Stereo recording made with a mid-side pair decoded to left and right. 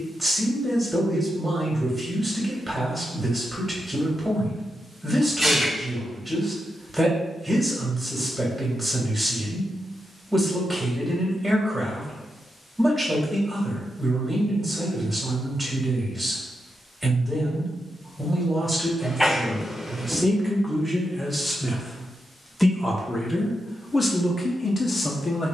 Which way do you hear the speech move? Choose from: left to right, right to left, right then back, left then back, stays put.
right to left.